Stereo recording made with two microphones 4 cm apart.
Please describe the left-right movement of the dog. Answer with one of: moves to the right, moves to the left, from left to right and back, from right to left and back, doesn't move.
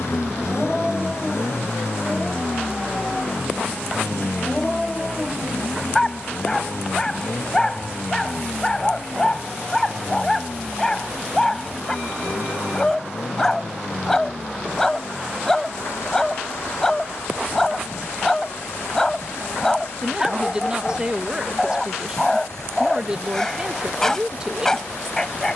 doesn't move.